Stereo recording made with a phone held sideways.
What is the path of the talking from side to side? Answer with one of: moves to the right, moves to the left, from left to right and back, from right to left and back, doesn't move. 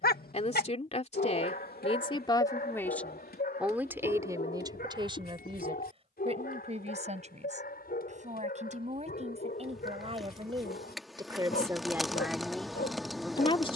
from left to right and back.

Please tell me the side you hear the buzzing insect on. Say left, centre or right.
centre.